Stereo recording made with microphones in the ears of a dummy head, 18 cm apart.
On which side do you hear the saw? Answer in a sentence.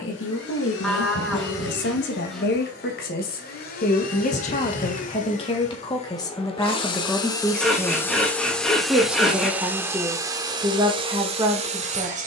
You can hear the saw in the centre.